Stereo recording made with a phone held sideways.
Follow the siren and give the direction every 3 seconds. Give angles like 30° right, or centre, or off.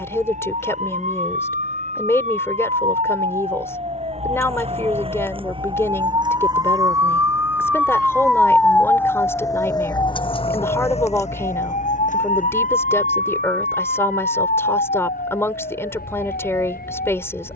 60° right, 50° right, 10° right, 40° left, 70° left, 80° left.